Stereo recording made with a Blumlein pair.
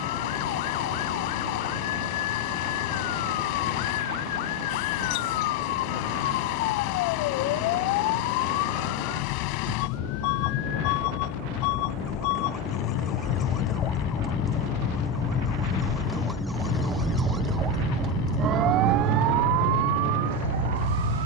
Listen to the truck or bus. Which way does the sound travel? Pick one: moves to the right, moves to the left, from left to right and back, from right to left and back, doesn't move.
doesn't move.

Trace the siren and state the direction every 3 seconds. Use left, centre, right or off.
left, left, left, left, left, centre, right.